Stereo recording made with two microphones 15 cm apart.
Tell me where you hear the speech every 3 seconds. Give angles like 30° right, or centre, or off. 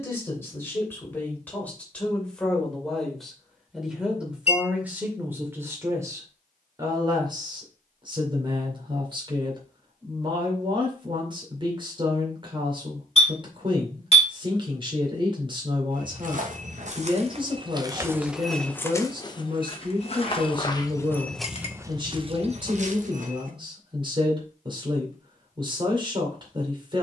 10° left, 10° right, 30° right, 30° right, 30° right, 30° right, 30° right, 30° right, 30° right.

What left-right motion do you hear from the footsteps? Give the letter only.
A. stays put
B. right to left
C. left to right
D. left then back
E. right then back
D.